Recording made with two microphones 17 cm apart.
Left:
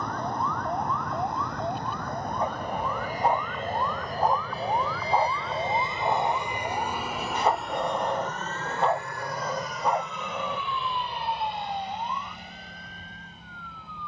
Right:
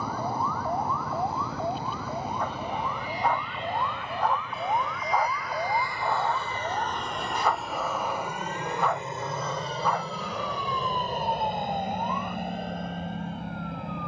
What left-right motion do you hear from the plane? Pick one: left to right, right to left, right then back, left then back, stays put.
left to right.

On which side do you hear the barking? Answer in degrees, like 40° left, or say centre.
20° left.